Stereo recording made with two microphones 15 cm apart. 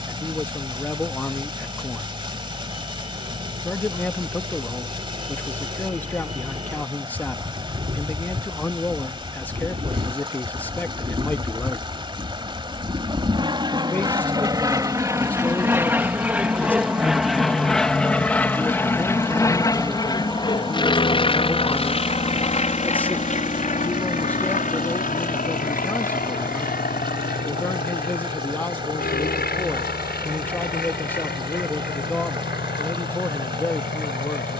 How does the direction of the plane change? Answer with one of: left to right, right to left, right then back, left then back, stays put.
right to left.